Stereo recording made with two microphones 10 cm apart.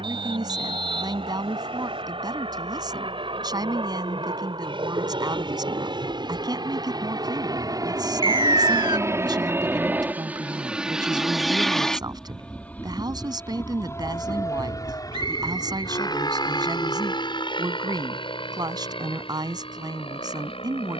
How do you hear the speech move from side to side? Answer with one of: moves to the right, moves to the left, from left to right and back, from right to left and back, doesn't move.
doesn't move.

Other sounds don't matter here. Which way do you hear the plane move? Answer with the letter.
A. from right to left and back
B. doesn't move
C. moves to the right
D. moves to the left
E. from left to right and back
D.